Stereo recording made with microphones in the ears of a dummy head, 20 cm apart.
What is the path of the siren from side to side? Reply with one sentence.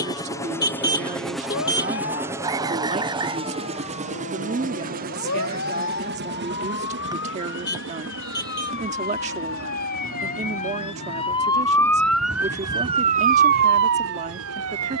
You can hear the siren go from the left side to the right.